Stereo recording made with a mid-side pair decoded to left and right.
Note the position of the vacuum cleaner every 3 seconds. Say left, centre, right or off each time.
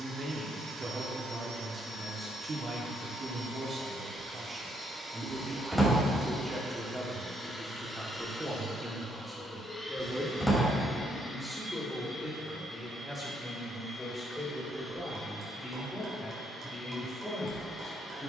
right, right, centre, left, left, left.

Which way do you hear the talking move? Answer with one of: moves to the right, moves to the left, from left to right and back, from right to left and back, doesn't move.
moves to the left.